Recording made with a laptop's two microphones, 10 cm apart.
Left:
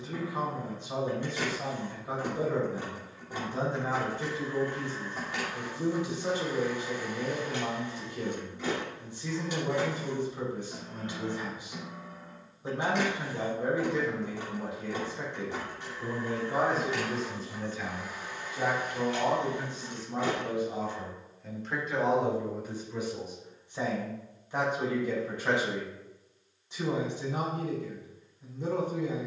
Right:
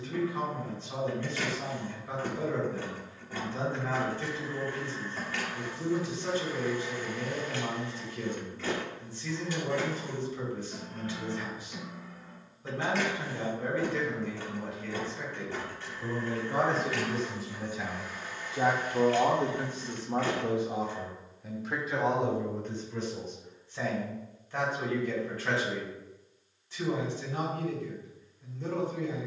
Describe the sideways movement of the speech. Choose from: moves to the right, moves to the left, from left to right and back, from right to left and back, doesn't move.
from left to right and back.